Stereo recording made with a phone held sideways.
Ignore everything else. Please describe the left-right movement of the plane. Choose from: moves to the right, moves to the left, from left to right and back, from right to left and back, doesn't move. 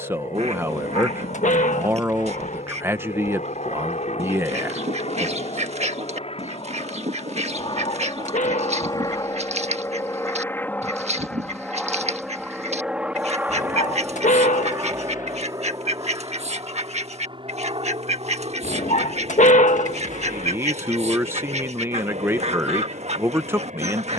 moves to the right.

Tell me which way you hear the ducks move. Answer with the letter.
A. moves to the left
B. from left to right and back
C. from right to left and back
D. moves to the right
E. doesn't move
E.